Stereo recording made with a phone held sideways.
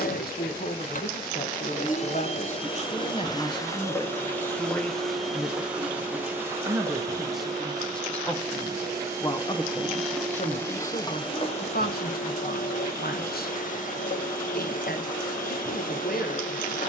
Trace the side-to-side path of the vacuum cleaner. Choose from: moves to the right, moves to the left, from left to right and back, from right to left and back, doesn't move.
from left to right and back.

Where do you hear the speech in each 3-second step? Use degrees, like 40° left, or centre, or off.
60° left, 20° left, centre, 50° left, 70° left, 70° left.